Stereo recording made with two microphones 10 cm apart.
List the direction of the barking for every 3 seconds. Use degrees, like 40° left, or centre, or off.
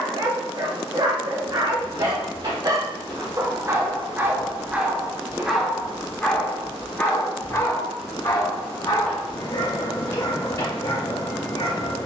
40° right, 10° right, 30° left, 50° left.